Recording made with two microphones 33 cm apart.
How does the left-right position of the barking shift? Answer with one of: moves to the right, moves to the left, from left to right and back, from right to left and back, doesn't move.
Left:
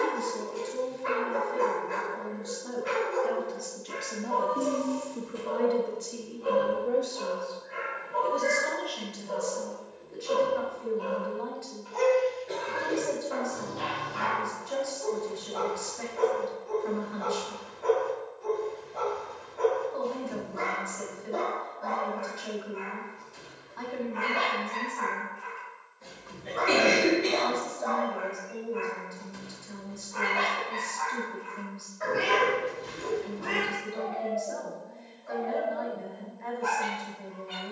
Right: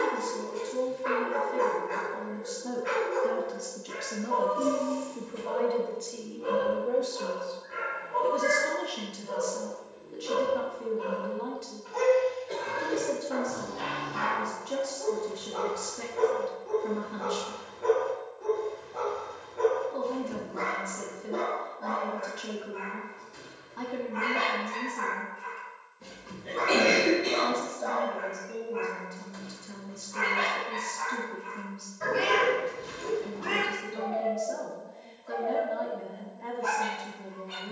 moves to the left.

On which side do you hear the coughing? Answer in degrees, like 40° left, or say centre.
80° left.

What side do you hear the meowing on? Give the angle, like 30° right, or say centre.
80° right.